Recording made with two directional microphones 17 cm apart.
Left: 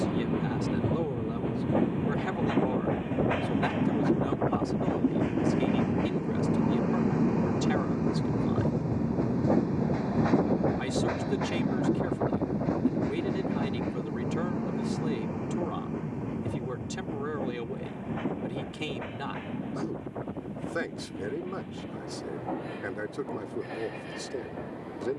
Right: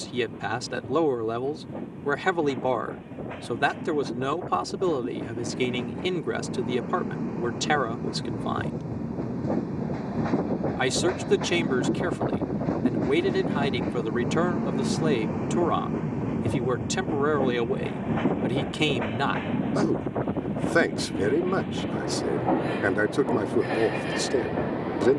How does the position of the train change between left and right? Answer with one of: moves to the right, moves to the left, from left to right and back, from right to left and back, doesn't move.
moves to the right.